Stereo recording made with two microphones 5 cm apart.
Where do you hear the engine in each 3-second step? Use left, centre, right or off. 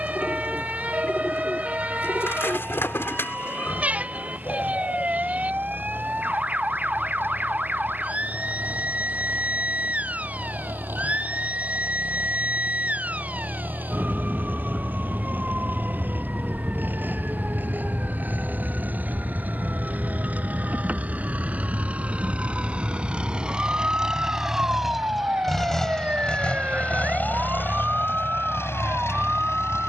right, right, right, right, right, right, right, right, centre, left.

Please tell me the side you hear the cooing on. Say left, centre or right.
left.